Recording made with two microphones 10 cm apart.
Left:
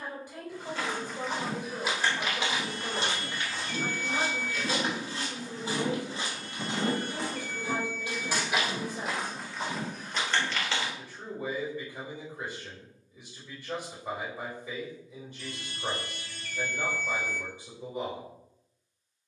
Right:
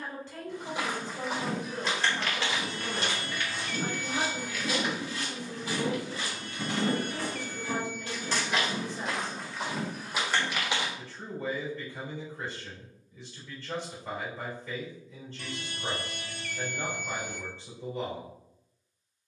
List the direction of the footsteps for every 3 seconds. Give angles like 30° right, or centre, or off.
10° left, 40° left, 20° left, centre, off, off, off.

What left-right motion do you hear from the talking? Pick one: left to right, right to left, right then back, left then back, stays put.
stays put.